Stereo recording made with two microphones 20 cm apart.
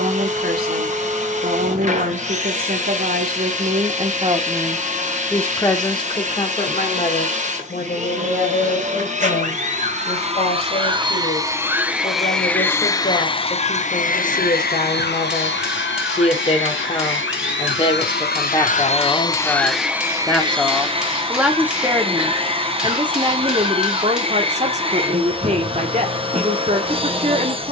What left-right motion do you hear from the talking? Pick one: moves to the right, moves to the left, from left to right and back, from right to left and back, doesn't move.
from right to left and back.